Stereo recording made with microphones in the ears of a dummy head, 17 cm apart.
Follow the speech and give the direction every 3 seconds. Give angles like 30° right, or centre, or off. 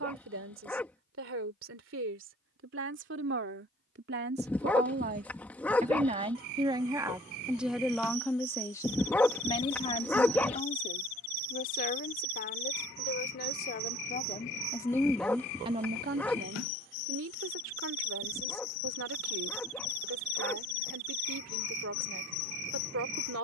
70° right, 60° right, 10° right, 40° left, 40° left, 50° right, 70° right, 70° right.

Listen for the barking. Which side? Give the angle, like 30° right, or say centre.
10° left.